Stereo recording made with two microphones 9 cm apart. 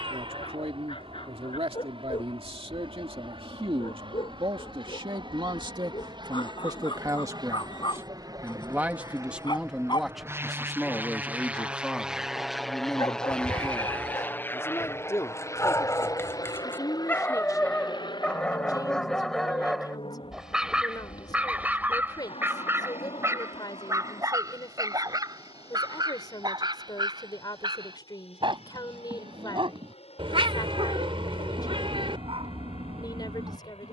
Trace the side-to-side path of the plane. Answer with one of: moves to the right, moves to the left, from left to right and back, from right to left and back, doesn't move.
moves to the left.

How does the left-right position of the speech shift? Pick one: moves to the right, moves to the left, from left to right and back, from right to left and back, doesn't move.
moves to the left.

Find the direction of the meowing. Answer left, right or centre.
right.